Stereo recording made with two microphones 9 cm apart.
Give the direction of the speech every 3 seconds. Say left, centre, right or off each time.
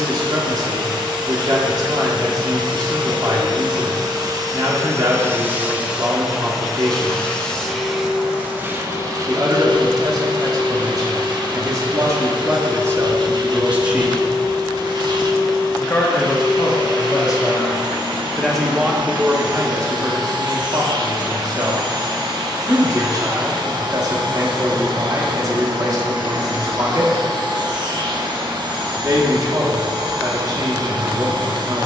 right, right, right, right, right, left, right, right, right, right, right.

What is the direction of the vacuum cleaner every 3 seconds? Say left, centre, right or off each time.
right, right, centre, right, right, right, right, right, right, right, right.